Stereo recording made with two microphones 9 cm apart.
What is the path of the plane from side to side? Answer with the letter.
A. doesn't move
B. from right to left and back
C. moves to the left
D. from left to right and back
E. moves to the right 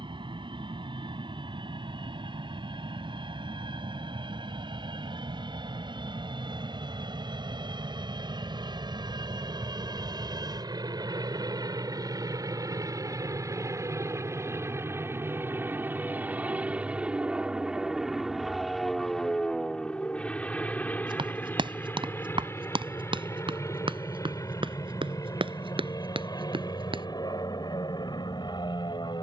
C.